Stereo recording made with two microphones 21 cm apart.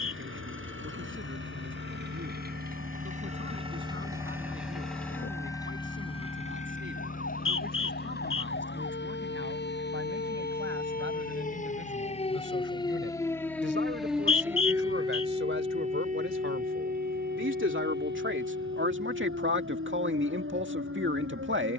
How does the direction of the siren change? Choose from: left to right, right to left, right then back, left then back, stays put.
left to right.